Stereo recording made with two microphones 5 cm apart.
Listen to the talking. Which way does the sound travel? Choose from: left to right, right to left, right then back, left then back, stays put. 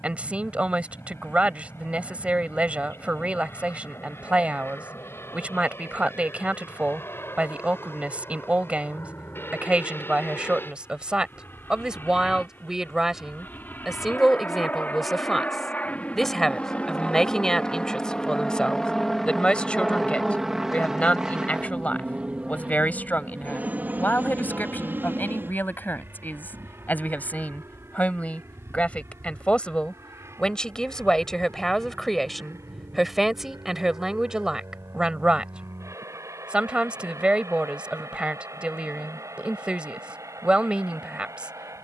left then back.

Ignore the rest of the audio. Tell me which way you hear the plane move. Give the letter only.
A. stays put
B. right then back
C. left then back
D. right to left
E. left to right
E.